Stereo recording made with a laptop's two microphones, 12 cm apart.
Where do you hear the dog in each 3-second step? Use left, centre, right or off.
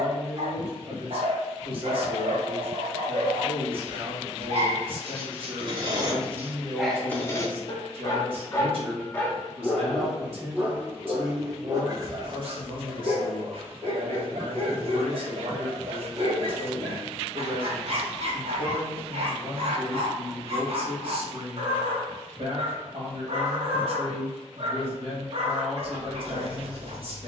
right, right, centre, centre, right, right, right, right, right.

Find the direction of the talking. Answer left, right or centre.
right.